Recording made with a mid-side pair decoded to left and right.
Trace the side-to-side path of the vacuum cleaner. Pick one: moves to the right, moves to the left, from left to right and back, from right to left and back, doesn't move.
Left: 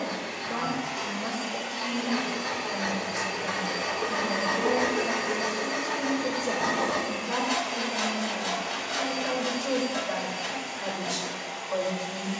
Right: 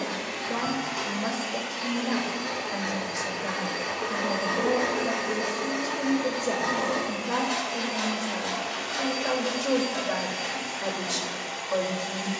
from right to left and back.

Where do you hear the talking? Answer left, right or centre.
right.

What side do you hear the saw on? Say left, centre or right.
left.